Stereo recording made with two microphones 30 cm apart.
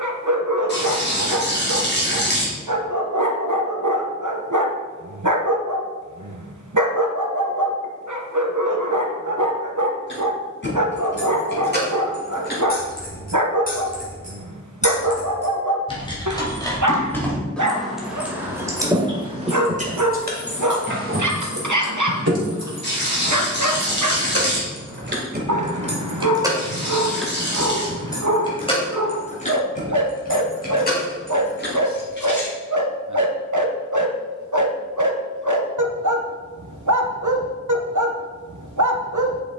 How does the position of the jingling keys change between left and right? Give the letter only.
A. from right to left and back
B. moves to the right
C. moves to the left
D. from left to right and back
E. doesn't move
D.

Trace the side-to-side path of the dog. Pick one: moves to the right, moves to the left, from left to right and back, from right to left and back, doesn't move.
doesn't move.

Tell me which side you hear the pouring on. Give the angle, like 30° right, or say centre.
40° left.